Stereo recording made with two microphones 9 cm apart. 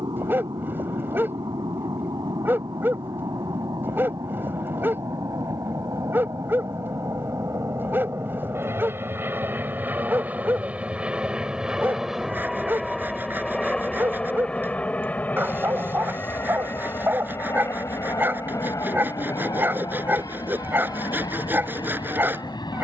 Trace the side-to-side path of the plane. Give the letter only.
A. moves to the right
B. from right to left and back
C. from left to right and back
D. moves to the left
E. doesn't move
D.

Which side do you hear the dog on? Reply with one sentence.
In this clip you hear the dog on the right.